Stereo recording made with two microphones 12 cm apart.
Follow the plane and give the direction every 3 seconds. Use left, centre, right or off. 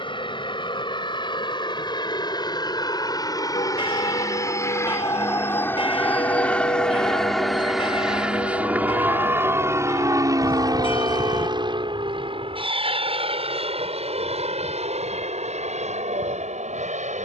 left, left, centre, right, right, right.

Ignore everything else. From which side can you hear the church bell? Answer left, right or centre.
left.